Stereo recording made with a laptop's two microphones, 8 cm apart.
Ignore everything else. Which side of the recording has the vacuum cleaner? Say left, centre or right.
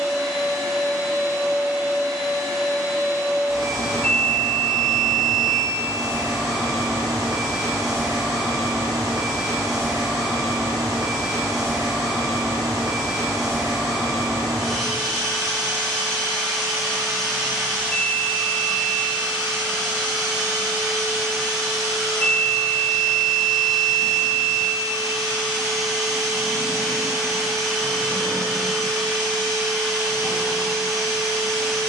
centre.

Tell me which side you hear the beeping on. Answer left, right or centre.
left.